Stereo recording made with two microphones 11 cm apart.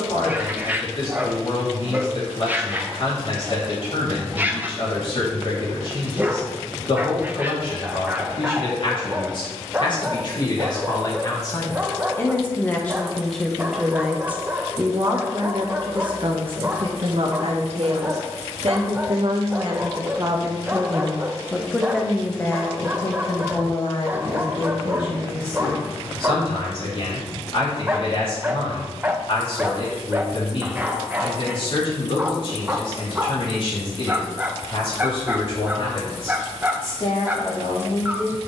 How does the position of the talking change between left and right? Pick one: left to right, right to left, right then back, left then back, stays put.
right then back.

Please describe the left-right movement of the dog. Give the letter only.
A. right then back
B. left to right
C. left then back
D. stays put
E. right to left
D.